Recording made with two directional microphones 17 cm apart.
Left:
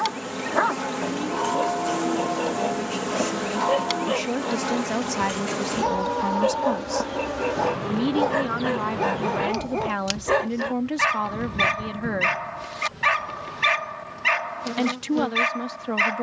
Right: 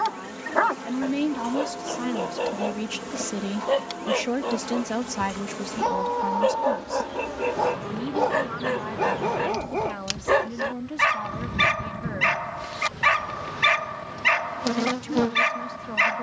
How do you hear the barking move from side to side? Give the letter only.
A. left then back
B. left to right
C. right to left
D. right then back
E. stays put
E.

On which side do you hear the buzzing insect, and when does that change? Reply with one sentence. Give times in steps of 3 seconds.
You can hear the buzzing insect on the left from 0 s, in the centre from 9 s and on the right from 12 s.